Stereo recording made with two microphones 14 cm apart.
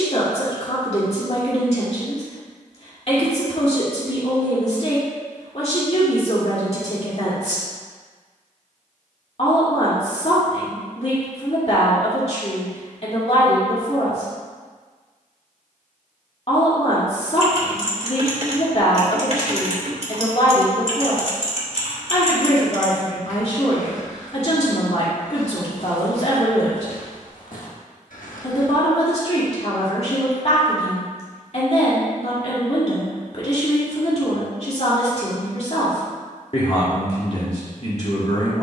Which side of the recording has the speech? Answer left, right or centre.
left.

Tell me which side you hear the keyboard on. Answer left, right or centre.
right.